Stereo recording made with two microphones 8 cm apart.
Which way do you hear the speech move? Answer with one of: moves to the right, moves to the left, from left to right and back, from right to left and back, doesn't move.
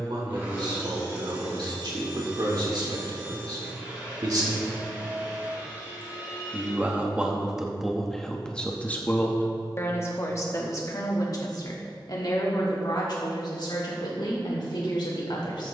moves to the left.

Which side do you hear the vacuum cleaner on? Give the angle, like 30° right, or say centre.
20° right.